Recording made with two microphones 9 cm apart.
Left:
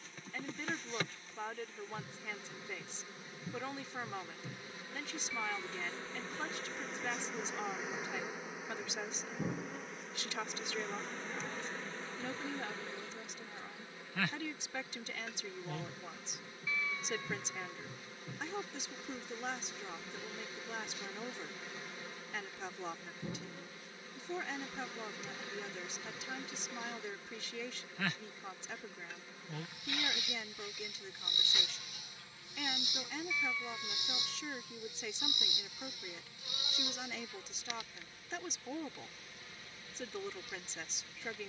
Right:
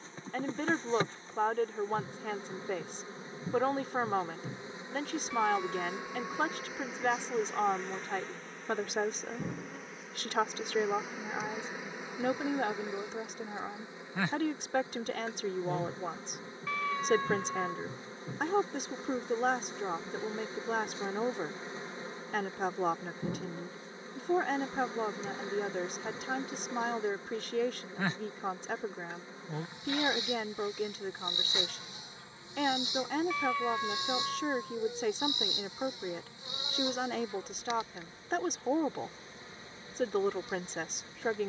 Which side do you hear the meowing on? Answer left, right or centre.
right.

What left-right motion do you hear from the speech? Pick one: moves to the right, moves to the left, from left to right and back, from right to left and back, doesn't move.
doesn't move.